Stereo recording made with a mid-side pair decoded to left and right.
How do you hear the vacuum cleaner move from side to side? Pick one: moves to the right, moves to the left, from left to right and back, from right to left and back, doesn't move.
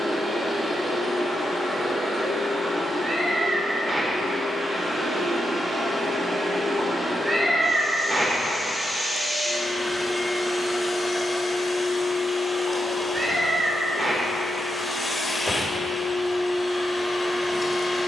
moves to the left.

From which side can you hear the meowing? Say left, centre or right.
right.